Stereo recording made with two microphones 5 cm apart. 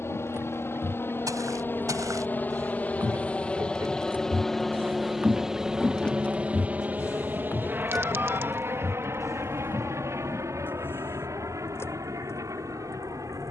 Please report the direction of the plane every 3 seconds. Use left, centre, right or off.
left, centre, right, right, right.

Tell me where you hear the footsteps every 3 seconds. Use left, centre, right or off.
right, right, left, left, off.